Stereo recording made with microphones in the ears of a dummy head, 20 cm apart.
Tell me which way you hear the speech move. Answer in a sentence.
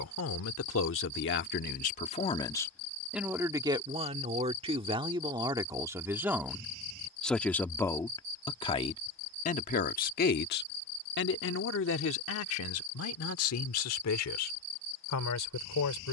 In this clip you hear the speech go right and come back.